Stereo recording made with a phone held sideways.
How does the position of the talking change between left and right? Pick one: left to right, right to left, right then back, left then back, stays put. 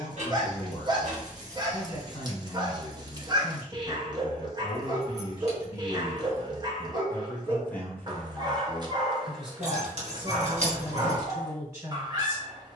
left to right.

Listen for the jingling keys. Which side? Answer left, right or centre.
right.